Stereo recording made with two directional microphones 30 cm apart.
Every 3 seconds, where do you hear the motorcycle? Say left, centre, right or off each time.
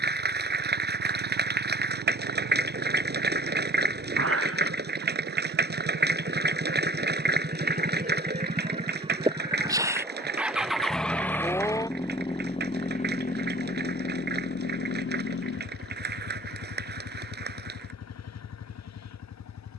right, right, right, centre, left, left, left.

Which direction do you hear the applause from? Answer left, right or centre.
right.